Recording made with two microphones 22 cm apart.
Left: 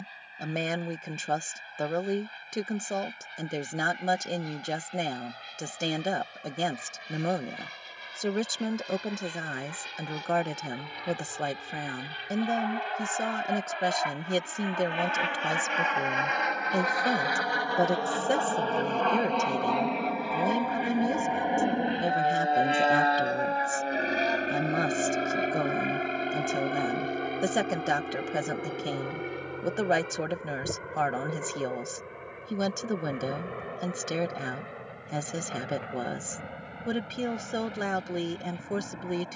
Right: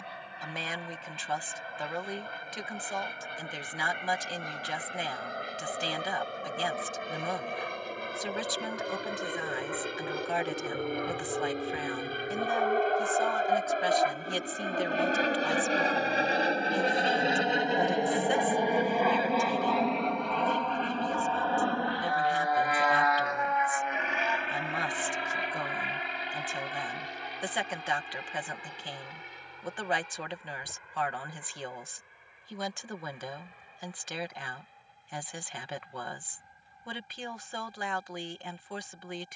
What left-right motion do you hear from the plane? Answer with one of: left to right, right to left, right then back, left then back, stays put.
right to left.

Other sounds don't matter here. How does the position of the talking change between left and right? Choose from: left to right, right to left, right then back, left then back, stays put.
stays put.